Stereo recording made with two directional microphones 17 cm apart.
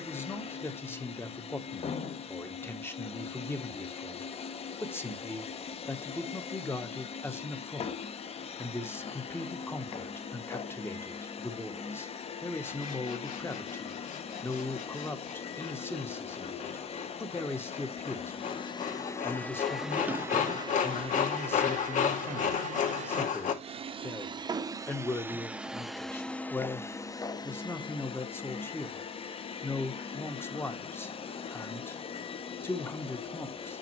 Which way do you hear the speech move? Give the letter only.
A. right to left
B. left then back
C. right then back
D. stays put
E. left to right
D.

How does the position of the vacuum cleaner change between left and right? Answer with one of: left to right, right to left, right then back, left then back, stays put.
right then back.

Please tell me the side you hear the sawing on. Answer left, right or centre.
left.